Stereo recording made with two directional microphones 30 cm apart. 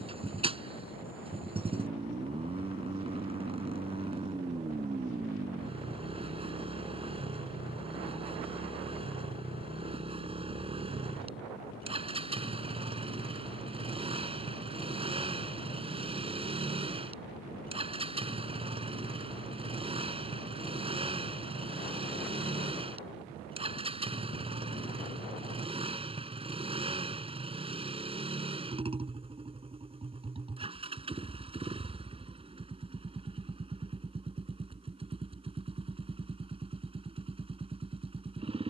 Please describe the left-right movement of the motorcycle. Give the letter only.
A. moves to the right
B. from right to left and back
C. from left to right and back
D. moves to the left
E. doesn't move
E.